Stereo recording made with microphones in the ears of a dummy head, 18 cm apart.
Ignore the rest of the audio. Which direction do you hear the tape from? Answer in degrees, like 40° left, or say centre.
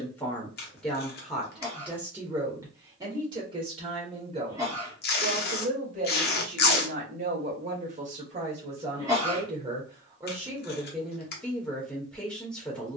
50° left.